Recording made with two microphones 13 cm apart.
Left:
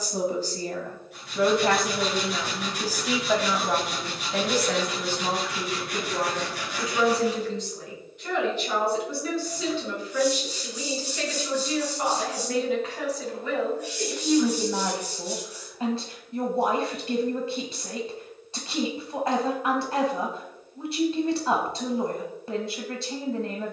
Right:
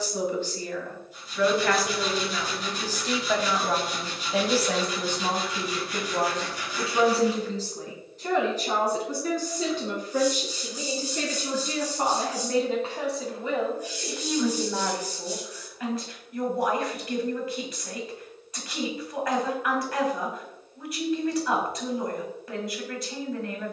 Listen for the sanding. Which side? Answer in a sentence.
You can hear the sanding on the left.